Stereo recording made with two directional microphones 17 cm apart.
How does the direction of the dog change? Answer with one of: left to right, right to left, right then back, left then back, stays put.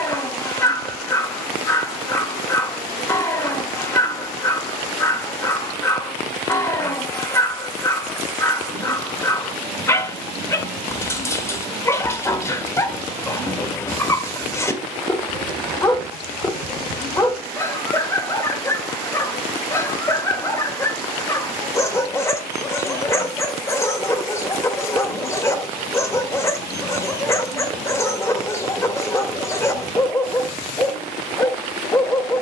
stays put.